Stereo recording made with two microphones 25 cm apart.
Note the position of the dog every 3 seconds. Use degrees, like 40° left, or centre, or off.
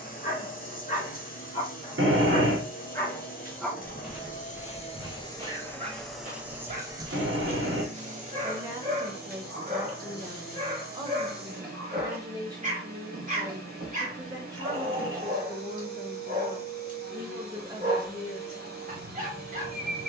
30° left, 10° right, 30° right, 30° right, 30° right, 30° right, 30° right.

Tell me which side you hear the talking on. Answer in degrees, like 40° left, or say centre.
20° right.